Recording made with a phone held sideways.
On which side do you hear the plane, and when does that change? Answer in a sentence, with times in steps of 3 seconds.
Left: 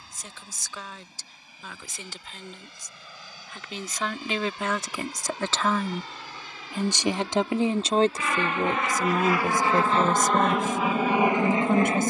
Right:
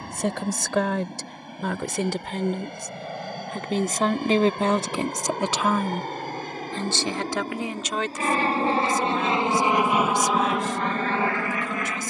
You can hear the plane on the right from 0 s and in the centre from 9 s.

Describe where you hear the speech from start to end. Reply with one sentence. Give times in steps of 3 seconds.
In this clip you hear the speech on the right from 0 s and on the left from 6 s.